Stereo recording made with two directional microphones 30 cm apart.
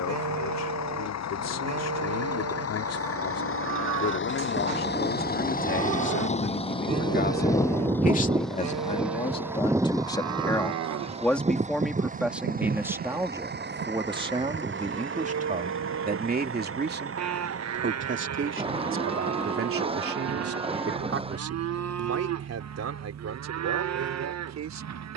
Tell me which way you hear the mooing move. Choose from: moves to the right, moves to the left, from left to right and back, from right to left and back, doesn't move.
doesn't move.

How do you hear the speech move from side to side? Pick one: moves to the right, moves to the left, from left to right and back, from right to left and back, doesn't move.
moves to the right.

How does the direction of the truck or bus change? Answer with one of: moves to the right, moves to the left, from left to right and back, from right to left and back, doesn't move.
moves to the right.